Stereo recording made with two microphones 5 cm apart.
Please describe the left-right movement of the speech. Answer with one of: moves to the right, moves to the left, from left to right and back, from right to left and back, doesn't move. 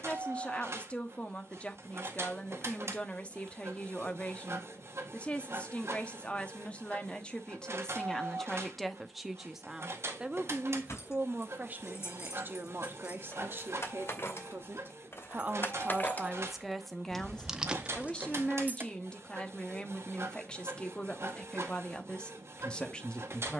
from left to right and back.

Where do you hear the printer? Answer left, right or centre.
right.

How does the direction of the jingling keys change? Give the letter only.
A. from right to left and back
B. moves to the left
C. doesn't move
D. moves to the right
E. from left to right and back
D.